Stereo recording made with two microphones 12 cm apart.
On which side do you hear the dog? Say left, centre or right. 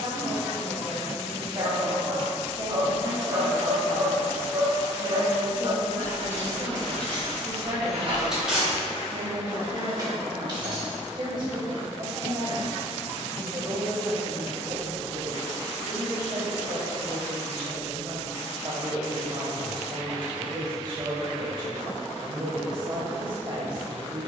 right.